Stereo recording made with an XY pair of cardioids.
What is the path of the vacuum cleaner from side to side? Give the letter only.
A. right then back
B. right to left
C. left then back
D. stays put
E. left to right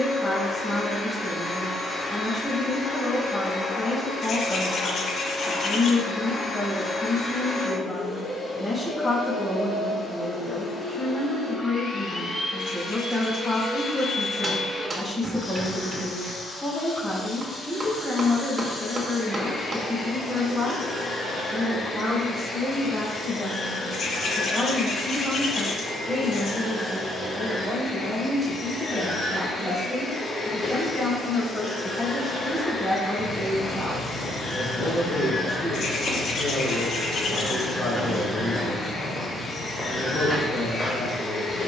D.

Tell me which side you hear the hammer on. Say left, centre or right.
right.